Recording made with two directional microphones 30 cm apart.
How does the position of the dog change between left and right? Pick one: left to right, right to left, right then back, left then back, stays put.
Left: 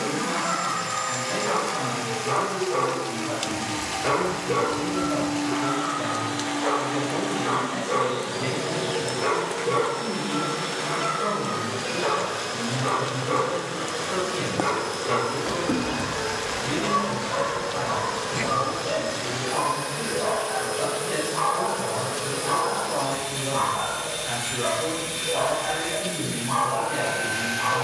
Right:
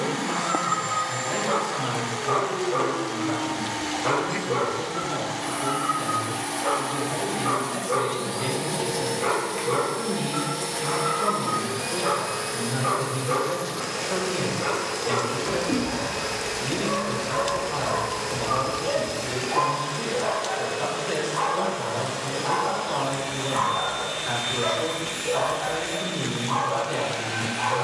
left to right.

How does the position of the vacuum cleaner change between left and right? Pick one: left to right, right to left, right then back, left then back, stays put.
right to left.